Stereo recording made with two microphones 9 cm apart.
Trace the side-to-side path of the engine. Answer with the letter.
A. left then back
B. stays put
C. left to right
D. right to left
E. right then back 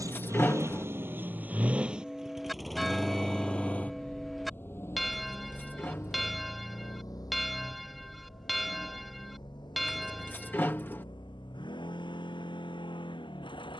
D.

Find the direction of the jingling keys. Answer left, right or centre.
left.